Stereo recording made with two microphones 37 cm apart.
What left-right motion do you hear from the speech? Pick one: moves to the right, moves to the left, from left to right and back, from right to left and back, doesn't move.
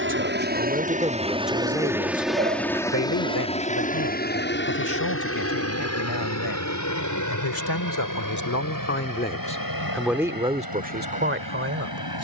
from right to left and back.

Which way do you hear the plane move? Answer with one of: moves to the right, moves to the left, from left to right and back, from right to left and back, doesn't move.
moves to the left.